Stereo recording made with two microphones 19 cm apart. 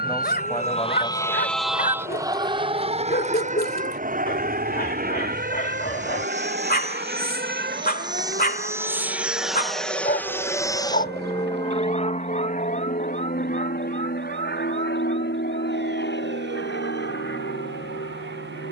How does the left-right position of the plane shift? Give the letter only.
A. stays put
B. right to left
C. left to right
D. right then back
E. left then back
B.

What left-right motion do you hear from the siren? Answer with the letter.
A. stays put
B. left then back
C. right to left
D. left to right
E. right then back
D.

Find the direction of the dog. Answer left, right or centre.
left.